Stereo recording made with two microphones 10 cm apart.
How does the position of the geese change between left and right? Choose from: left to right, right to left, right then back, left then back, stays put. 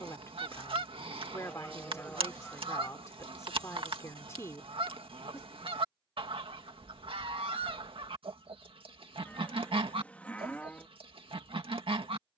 stays put.